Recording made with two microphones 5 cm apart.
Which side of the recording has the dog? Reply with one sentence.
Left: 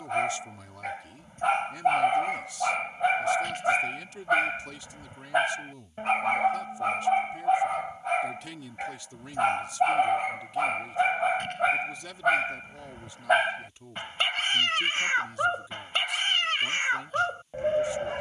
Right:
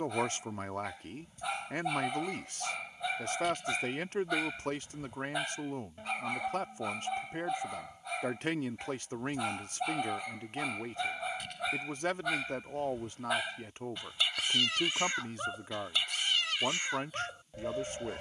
In this clip you hear the dog on the left.